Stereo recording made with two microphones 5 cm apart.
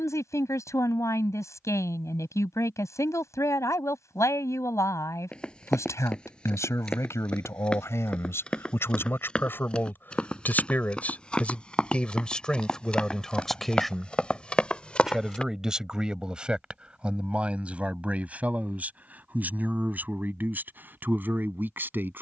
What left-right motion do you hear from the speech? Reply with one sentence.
You can hear the speech go from the left side to the right.